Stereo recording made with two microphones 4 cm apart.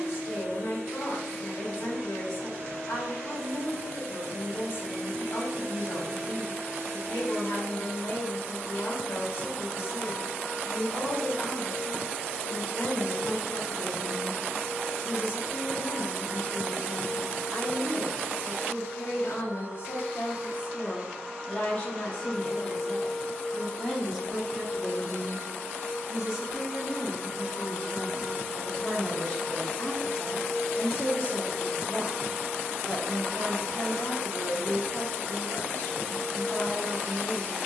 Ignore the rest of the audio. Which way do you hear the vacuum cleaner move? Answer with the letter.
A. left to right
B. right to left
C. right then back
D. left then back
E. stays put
D.